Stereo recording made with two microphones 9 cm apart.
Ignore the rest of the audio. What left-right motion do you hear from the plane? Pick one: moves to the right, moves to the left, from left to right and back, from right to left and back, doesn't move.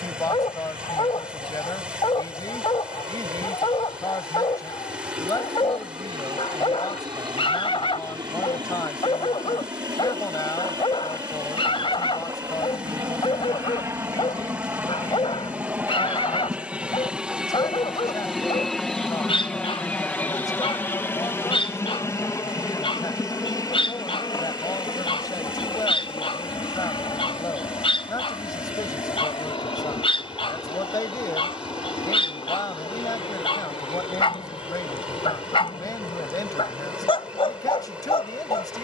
moves to the left.